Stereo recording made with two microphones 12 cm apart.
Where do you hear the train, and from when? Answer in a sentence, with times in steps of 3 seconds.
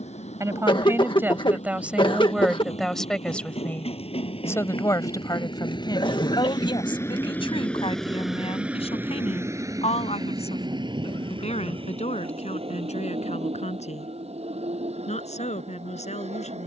You can hear the train on the left from 0 s, in the centre from 6 s and on the right from 9 s.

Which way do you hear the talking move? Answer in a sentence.
In this clip you hear the talking move from right to left.